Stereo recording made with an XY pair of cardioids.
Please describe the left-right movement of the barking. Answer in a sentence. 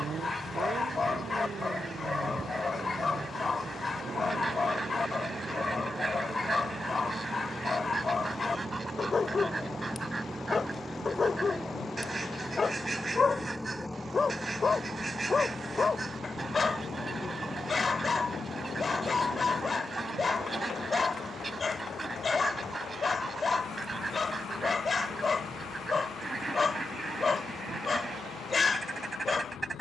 You can hear the barking stay in one place.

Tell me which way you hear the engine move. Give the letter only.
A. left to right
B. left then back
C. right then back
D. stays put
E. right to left
E.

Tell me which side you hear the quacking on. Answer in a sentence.
In this clip you hear the quacking on the right.